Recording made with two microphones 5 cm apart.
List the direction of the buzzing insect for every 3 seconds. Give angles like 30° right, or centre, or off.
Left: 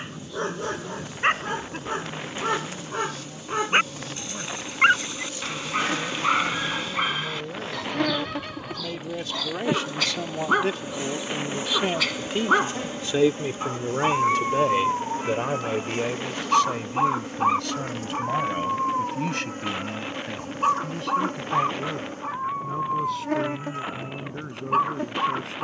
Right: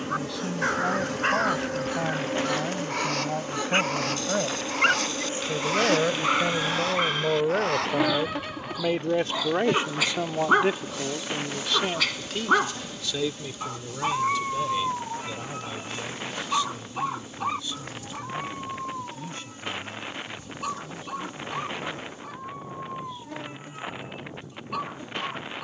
60° right, 40° right, 10° right, 20° left, 40° left, 50° left, 50° left, 60° left, 60° left.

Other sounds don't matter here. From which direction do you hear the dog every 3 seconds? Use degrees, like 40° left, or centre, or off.
30° left, 20° left, centre, 10° right, 10° left, 20° left, 30° left, 30° left, 30° left.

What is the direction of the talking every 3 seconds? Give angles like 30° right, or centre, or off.
70° right, 70° right, 50° right, 10° right, 40° left, 60° left, 70° left, 70° left, 80° left.